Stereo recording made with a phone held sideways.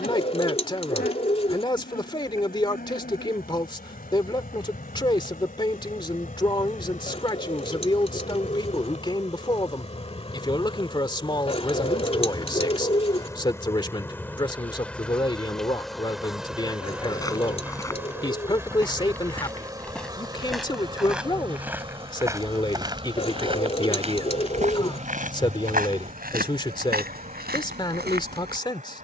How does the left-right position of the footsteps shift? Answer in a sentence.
You can hear the footsteps move from left to right.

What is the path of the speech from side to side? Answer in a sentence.
In this clip you hear the speech stay put.